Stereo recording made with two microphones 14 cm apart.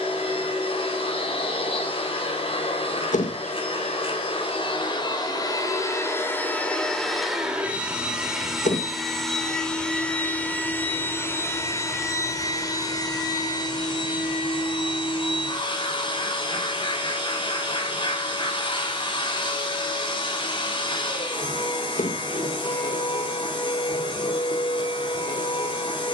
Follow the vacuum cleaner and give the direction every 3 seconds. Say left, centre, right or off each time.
left, left, centre, centre, left, left, left, left, left.